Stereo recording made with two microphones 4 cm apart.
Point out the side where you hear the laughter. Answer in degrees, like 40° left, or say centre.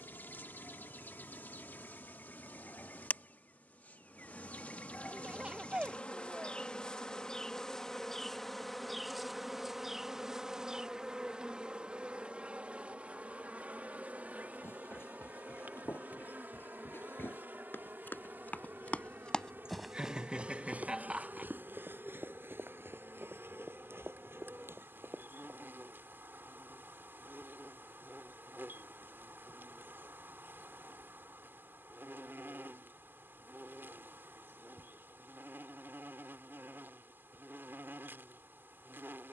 20° right.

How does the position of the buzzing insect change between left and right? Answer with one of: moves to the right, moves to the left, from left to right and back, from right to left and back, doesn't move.
moves to the right.